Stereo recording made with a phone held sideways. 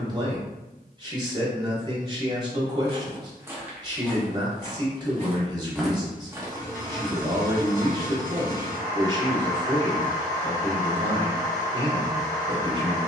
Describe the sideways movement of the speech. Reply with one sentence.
In this clip you hear the speech stay put.